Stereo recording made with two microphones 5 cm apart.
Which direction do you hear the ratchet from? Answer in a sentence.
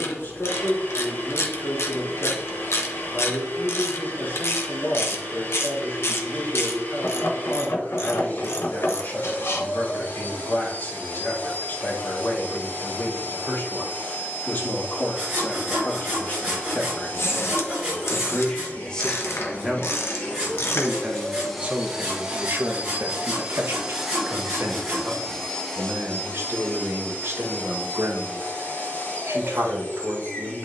You can hear the ratchet on the left.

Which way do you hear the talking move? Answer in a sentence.
You can hear the talking move from left to right.